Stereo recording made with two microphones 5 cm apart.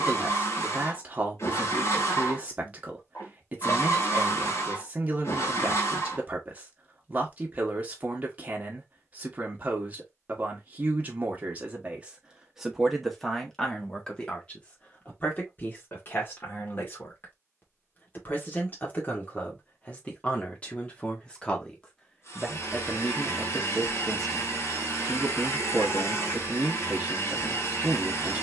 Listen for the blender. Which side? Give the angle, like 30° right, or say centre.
60° left.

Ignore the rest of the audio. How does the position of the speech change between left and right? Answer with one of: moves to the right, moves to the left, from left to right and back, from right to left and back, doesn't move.
from right to left and back.